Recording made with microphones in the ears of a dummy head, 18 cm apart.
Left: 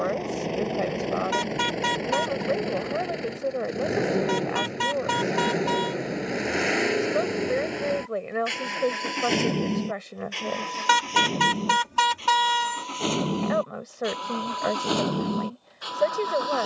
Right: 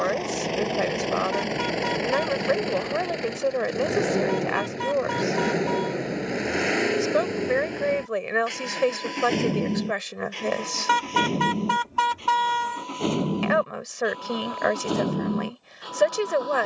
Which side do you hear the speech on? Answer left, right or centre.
right.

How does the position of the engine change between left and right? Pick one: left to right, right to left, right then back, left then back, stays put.
right to left.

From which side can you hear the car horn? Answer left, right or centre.
left.